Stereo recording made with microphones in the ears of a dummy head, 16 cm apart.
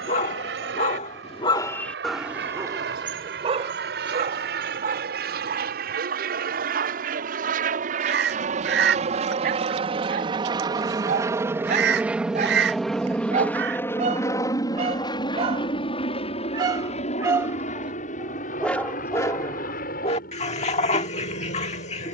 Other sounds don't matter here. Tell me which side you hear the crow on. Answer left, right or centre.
right.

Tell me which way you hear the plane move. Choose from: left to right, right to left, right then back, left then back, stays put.
right to left.